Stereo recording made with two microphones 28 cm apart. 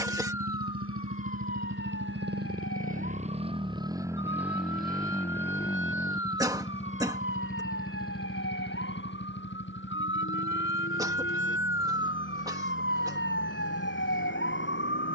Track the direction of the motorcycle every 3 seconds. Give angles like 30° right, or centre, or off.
50° right, 10° right, 30° left, 40° left, 50° left.